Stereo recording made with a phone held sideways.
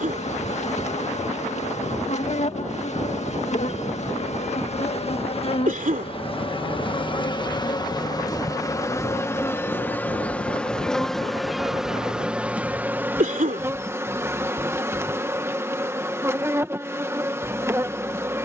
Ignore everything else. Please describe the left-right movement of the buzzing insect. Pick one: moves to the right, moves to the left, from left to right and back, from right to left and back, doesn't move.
moves to the right.